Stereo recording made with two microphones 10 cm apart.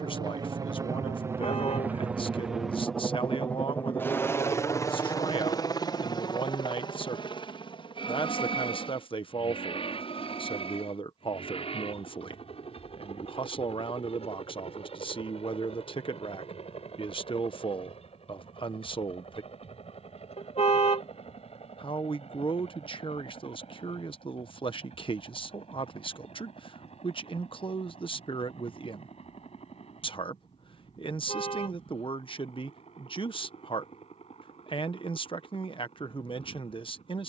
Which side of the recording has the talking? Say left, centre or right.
left.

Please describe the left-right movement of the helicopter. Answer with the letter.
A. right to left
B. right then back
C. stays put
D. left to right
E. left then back
A.